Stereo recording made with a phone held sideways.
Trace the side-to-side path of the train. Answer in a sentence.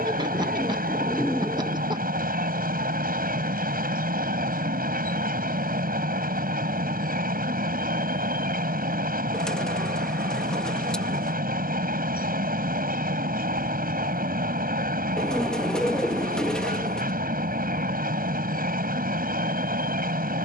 In this clip you hear the train stay in one place.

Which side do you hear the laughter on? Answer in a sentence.
You can hear the laughter on the right.